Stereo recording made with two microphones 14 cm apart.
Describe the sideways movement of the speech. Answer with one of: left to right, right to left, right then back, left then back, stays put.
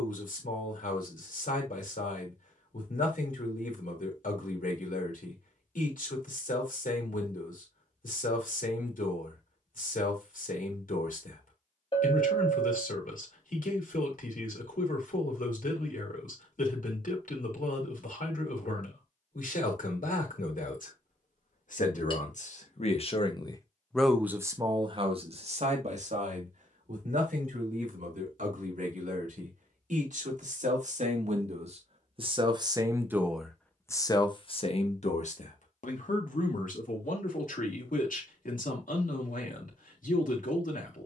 right then back.